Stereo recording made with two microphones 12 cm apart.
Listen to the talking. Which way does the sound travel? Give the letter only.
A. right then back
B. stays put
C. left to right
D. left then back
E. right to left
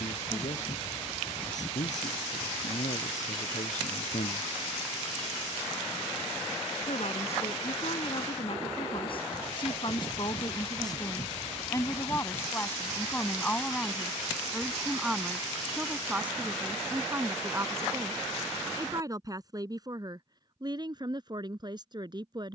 C.